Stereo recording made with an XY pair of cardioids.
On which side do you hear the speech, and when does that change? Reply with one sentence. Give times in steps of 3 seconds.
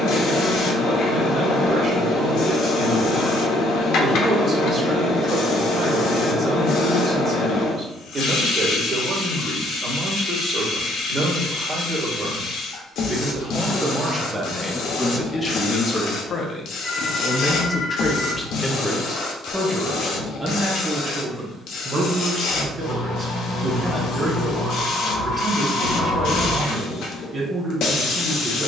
You can hear the speech on the right from 0 s, on the left from 15 s, in the centre from 18 s and on the right from 21 s.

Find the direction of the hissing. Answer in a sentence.
You can hear the hissing on the left.